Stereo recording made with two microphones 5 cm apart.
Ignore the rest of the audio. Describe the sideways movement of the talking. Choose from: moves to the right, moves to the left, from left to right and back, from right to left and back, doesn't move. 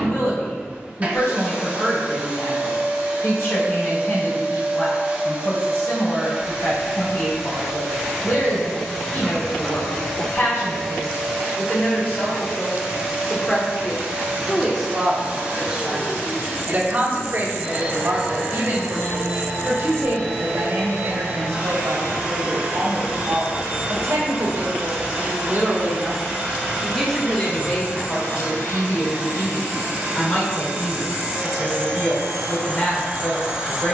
from left to right and back.